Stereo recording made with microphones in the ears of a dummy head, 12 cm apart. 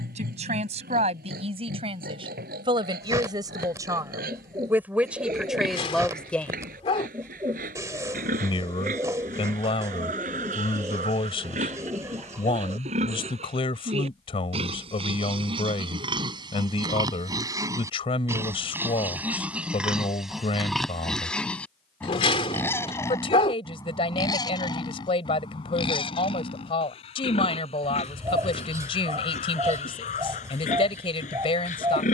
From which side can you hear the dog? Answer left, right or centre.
left.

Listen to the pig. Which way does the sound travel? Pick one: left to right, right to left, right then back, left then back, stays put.
right to left.